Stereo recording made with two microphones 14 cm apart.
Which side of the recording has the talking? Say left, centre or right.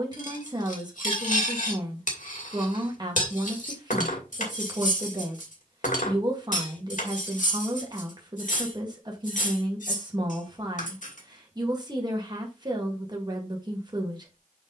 right.